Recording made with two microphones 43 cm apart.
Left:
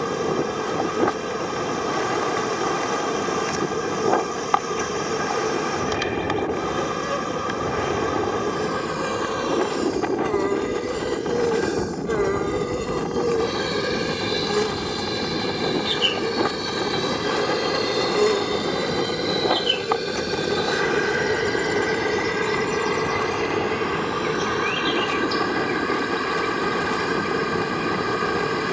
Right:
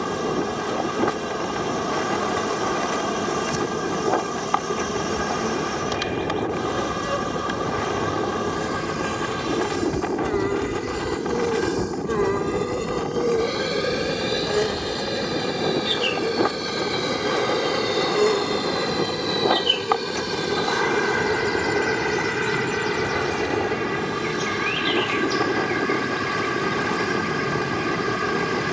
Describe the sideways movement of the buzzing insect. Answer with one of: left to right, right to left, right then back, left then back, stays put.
left then back.